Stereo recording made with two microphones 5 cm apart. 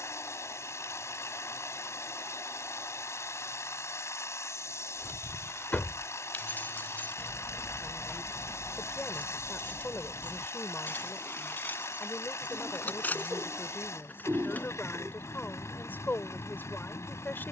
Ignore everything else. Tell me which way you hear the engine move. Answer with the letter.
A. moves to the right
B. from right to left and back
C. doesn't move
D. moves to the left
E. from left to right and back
C.